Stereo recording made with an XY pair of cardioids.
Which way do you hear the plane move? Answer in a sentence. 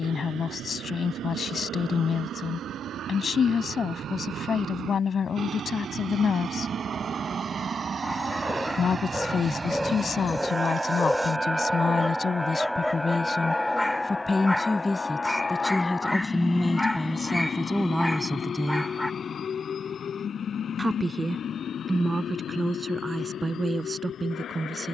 You can hear the plane go from the right side to the left.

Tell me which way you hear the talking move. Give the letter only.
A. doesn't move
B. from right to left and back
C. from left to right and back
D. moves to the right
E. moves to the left
D.